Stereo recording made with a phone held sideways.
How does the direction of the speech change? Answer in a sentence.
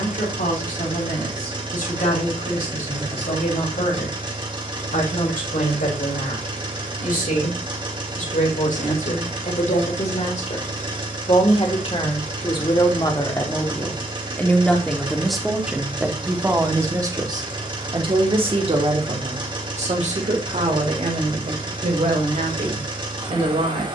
In this clip you hear the speech move to the right.